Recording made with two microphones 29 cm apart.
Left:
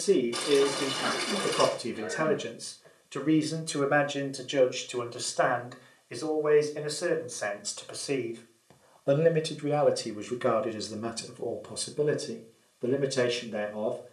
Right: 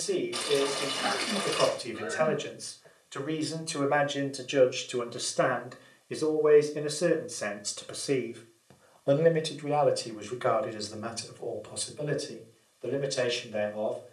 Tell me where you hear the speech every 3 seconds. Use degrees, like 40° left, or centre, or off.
60° left, centre, 30° right, 30° left, 60° left.